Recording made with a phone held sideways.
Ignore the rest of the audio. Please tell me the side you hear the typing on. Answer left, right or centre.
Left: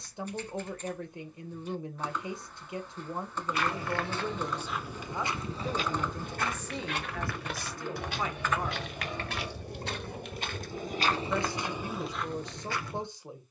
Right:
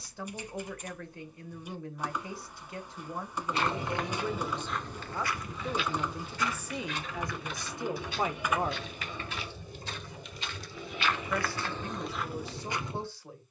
centre.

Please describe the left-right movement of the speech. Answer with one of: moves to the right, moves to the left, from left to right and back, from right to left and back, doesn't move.
from left to right and back.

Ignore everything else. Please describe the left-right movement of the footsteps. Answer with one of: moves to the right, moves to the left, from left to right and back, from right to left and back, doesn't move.
from right to left and back.